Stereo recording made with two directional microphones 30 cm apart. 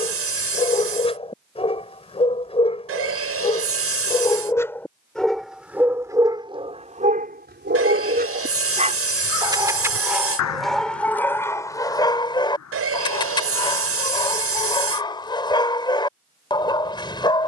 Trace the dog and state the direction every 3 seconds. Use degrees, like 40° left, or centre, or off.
20° left, 10° left, 20° right, centre, 10° left, 10° left.